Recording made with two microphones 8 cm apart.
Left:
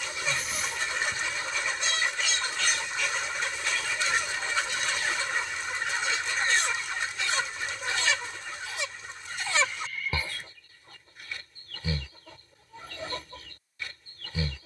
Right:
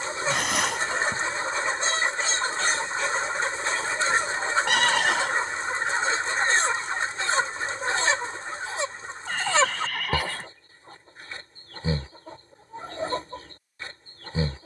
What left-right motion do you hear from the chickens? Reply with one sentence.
In this clip you hear the chickens stay put.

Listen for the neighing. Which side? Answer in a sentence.
You can hear the neighing on the right.